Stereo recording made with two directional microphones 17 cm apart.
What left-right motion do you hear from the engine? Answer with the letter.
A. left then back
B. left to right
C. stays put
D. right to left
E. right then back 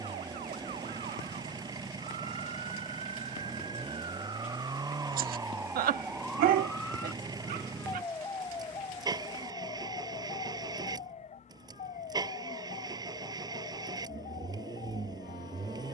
C.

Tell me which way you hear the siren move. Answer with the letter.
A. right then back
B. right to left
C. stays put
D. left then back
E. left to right
B.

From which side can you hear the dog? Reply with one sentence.
You can hear the dog on the right.